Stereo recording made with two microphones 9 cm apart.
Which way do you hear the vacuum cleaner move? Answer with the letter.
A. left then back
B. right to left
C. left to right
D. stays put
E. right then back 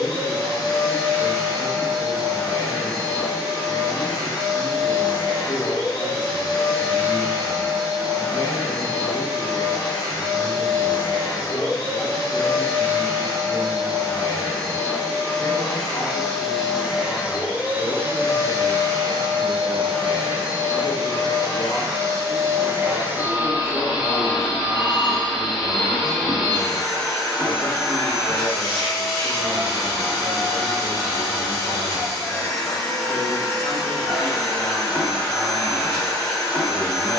E.